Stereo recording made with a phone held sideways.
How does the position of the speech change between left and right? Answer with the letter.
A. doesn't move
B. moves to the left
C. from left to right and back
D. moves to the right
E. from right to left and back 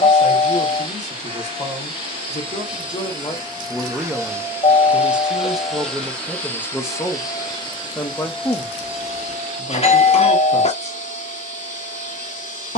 C.